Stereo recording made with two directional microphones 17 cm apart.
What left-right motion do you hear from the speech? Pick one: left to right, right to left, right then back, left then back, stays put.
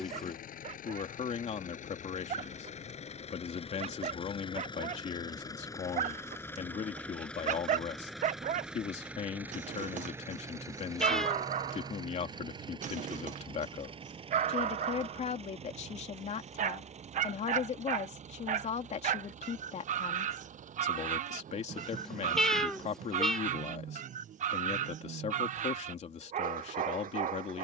stays put.